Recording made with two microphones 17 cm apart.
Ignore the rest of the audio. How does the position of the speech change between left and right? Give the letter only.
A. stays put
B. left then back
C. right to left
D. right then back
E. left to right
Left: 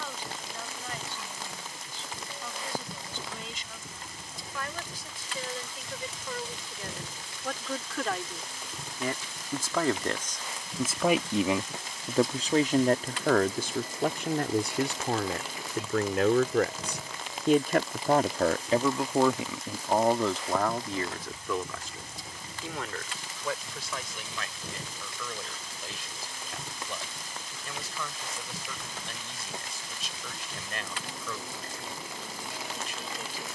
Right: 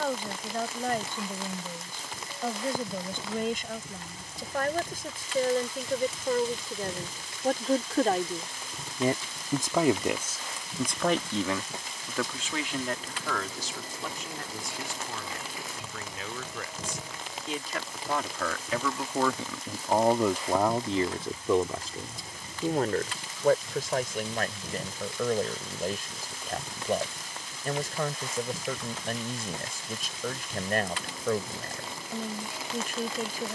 B.